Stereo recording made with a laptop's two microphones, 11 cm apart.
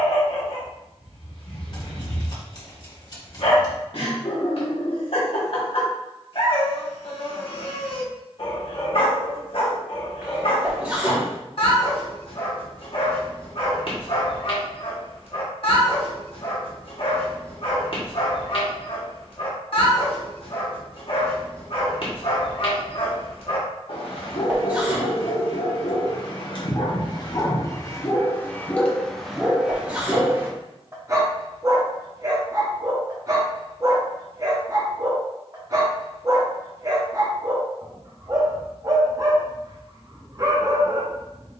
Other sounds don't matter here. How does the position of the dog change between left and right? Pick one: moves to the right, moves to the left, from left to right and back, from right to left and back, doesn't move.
moves to the right.